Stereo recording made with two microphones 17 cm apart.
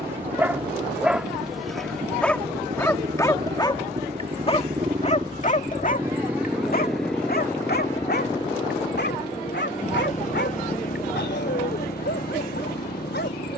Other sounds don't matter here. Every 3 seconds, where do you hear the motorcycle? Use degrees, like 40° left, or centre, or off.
60° right, 30° right, 10° left, 40° left, 60° left.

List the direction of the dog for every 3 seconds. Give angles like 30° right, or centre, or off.
centre, 30° left, 60° left, 80° left, 80° left.